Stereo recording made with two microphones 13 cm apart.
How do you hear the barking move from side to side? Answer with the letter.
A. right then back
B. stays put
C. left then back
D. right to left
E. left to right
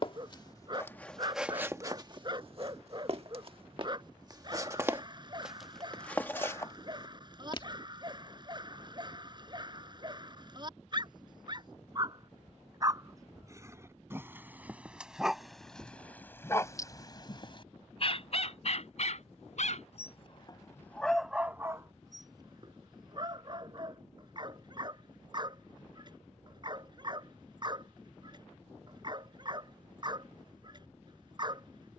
C.